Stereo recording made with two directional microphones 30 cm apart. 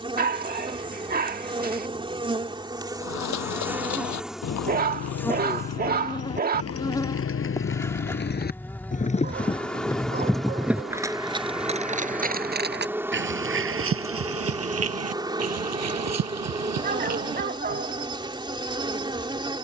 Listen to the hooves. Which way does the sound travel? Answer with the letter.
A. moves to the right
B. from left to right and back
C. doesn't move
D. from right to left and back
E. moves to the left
A.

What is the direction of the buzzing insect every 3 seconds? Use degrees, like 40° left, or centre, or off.
20° right, centre, 10° left, centre, 10° right, 10° right, 10° right.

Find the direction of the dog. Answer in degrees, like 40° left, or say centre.
30° right.